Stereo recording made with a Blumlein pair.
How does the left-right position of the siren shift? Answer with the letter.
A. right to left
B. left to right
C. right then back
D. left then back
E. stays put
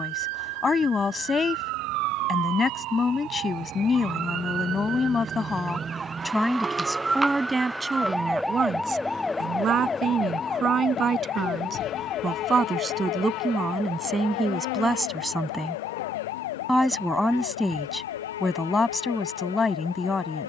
A.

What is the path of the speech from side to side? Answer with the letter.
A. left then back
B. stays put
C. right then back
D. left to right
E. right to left
C.